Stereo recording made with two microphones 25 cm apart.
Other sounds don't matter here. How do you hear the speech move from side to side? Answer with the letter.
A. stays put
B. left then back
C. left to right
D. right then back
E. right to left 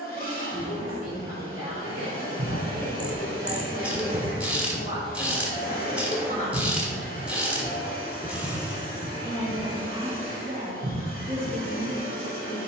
C.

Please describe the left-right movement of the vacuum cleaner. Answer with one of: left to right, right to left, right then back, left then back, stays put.
stays put.